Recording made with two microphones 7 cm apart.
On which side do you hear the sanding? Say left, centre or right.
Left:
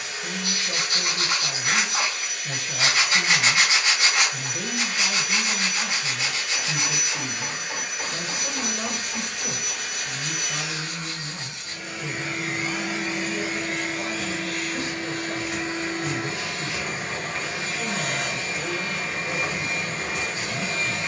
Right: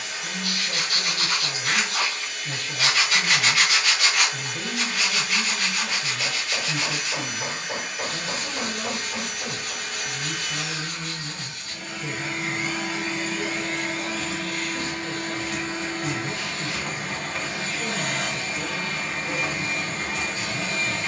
left.